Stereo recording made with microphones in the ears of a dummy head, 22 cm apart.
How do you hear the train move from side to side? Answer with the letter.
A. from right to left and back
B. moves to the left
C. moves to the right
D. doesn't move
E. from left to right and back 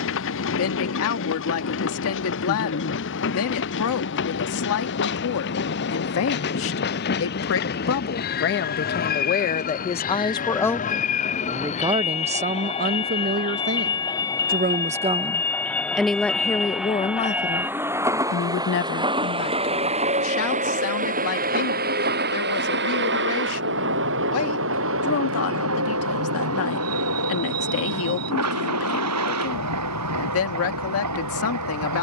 C.